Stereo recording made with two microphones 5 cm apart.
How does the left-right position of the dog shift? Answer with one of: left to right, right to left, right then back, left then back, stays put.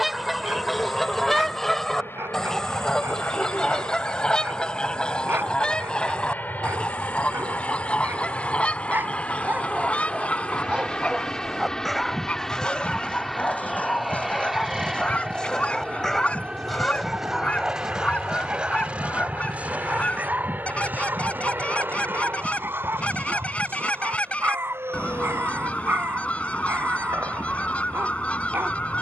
left then back.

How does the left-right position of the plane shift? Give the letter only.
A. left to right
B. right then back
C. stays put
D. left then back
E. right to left
A.